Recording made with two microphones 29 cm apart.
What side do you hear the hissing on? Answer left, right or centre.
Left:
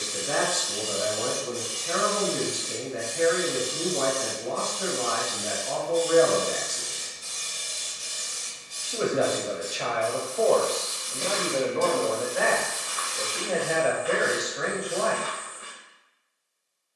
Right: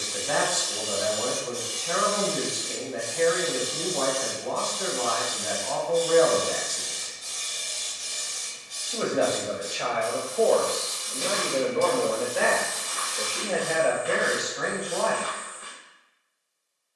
left.